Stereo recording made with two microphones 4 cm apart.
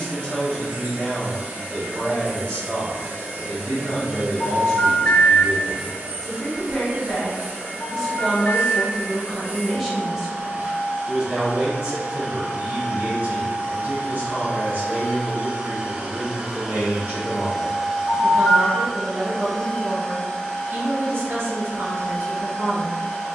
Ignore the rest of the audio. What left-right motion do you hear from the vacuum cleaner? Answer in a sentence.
You can hear the vacuum cleaner move to the left.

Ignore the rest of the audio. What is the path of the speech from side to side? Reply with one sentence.
You can hear the speech travel towards the right.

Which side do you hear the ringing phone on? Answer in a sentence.
You can hear the ringing phone on the left.